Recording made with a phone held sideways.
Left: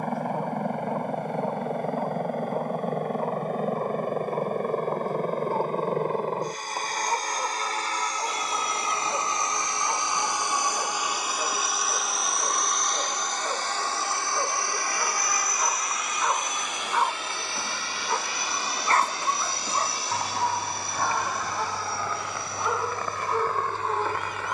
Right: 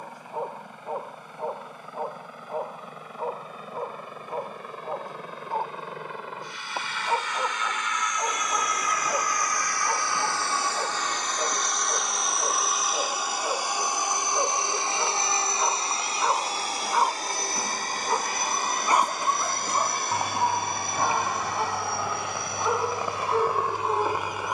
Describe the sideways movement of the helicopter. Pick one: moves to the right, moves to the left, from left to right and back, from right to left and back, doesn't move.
moves to the right.